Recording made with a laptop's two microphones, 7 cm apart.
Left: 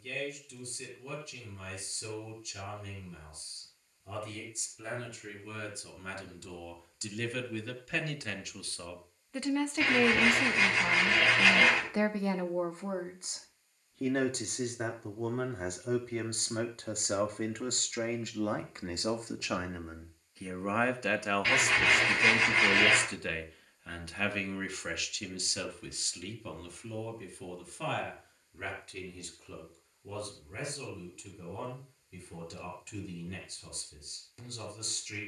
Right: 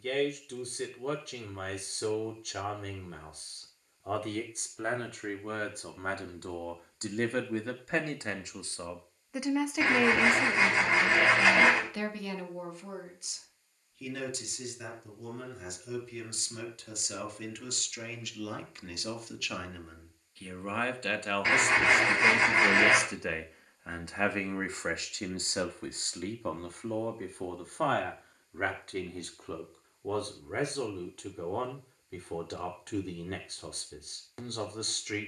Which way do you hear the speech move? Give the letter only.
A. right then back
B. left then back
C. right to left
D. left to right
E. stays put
B.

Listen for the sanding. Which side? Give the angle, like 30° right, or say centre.
20° right.